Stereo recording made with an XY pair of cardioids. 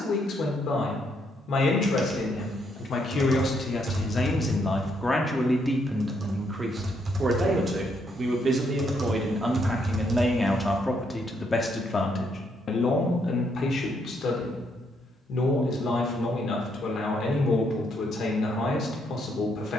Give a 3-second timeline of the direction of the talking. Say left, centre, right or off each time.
left, left, right, centre, left, left, left.